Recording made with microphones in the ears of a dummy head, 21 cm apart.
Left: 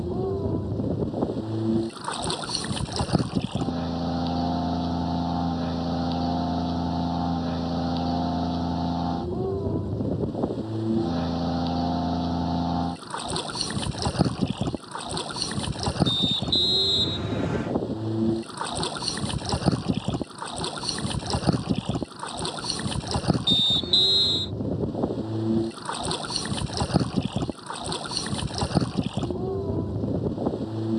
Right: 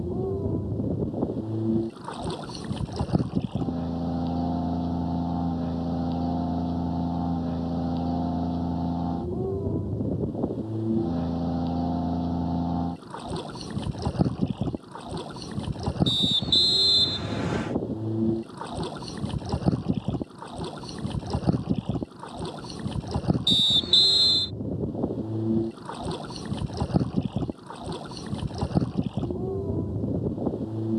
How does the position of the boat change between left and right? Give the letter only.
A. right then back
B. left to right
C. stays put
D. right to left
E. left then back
C.